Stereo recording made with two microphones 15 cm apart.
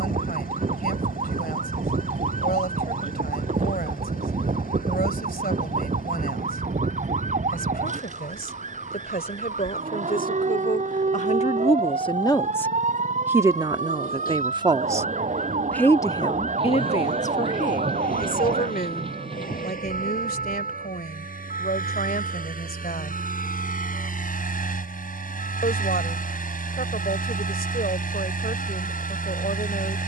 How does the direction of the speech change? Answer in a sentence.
You can hear the speech move from left to right and back again.